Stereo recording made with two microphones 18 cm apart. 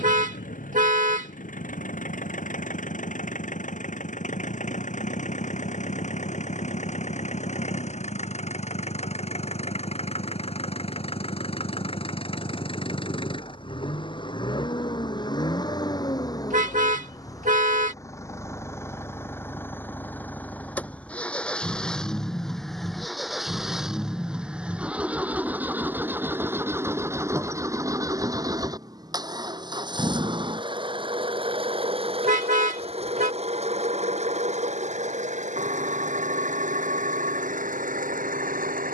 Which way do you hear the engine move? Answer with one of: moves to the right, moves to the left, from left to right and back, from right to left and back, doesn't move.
moves to the right.